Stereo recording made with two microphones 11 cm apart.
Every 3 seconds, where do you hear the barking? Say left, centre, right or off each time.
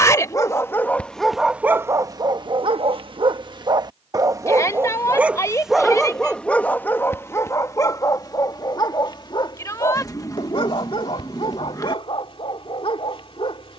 centre, right, left, left, left.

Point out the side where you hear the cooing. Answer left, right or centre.
left.